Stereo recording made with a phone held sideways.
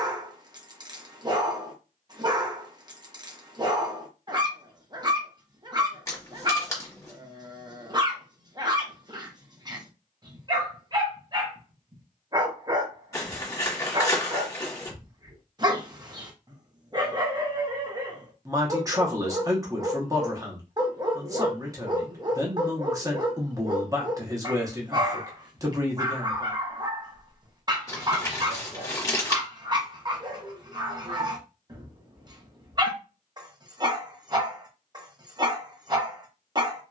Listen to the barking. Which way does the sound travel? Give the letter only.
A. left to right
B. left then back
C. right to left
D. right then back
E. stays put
E.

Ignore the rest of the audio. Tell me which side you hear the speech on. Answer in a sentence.
You can hear the speech on the right.